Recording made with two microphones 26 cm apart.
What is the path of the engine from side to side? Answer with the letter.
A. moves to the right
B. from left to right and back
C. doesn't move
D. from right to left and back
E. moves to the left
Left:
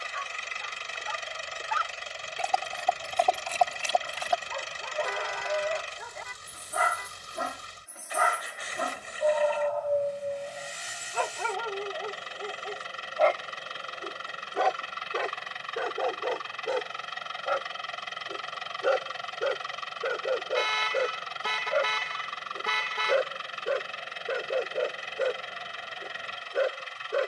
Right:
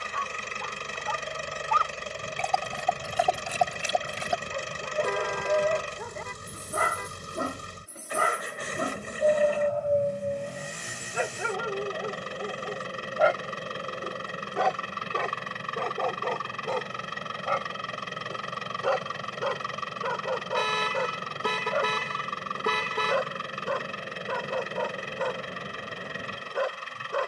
C.